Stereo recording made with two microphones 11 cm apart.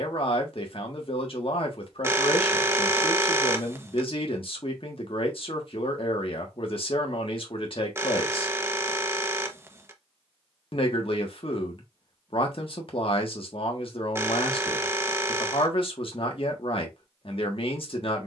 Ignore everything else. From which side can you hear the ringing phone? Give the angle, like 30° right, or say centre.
20° right.